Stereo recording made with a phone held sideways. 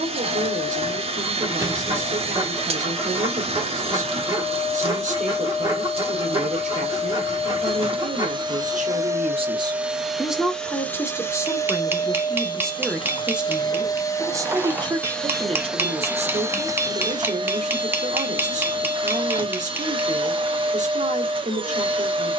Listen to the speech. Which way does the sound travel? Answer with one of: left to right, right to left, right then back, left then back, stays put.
left then back.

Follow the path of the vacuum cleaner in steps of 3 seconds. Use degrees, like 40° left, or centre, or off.
40° right, 40° right, 40° right, centre, 30° left, 20° right, 40° right, 40° right.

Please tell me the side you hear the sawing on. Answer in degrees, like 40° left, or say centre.
20° right.